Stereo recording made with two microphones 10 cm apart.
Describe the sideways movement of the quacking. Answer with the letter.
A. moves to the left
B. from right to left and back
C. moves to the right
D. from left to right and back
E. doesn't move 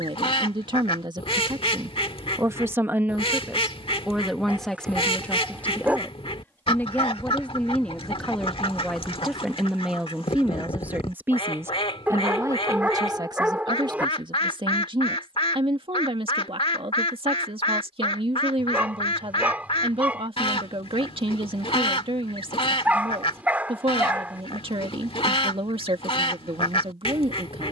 E.